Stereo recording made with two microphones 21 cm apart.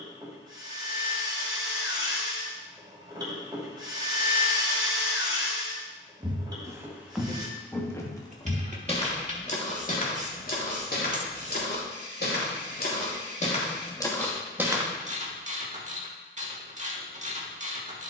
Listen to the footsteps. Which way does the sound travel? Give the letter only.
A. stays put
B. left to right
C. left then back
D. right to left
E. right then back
C.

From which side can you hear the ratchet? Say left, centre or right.
right.